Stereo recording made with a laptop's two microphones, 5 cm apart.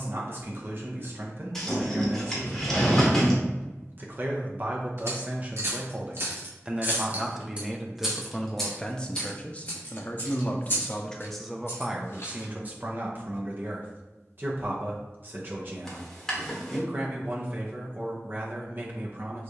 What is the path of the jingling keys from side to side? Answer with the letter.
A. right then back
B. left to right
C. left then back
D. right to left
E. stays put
D.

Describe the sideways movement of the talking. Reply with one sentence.
In this clip you hear the talking move from right to left and back again.